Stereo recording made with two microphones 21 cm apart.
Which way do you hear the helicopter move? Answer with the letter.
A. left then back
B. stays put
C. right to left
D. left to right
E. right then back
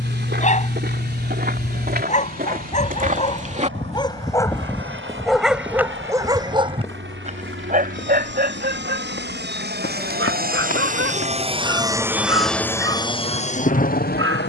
C.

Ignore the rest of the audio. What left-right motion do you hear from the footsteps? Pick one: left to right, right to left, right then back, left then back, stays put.
right to left.